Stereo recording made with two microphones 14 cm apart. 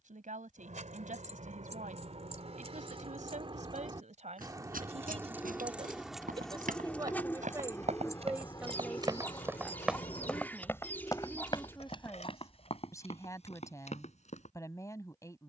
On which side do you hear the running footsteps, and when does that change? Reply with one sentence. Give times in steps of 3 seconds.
In this clip you hear the running footsteps not at all from 0 s, on the right from 3 s, in the centre from 9 s and on the left from 12 s.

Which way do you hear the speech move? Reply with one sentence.
In this clip you hear the speech go from the right side to the left.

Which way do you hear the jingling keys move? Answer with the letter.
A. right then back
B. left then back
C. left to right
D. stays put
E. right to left
E.